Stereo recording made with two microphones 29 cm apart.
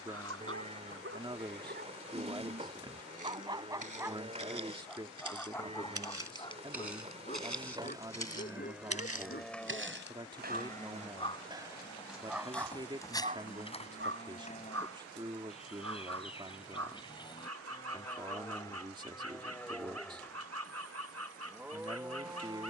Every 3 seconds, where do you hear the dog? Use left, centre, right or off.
right, centre, left, left, right, right, right, right.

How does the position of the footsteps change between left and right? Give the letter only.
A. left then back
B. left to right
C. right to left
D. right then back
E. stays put
C.